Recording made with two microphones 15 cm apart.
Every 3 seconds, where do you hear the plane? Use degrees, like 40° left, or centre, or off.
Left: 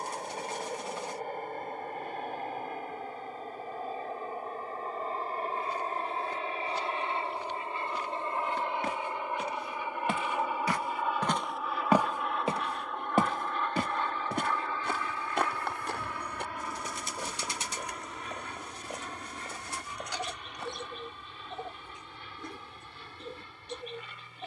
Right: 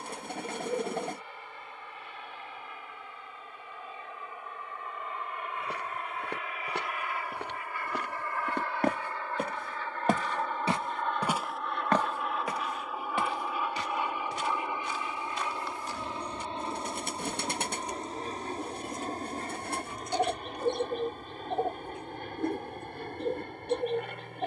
50° left, 40° left, 30° left, 10° left, 10° right, 20° right, 40° right, 50° right.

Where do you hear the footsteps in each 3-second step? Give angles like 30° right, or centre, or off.
off, 80° right, 70° right, 30° right, 40° left, 70° left, 70° left, off.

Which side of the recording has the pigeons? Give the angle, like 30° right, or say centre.
60° right.